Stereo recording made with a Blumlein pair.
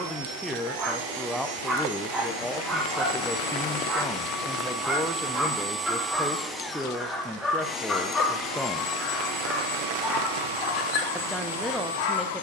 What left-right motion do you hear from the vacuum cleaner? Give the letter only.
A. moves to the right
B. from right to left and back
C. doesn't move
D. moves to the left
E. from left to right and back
D.